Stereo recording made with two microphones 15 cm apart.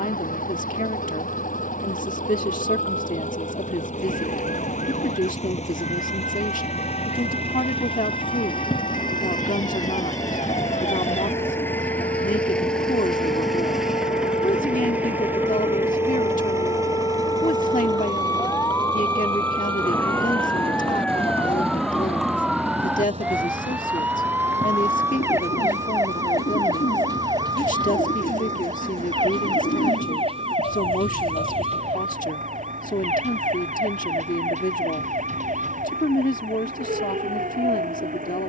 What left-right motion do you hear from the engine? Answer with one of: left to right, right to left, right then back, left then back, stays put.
left to right.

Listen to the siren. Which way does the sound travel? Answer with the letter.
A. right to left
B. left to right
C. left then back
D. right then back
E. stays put
B.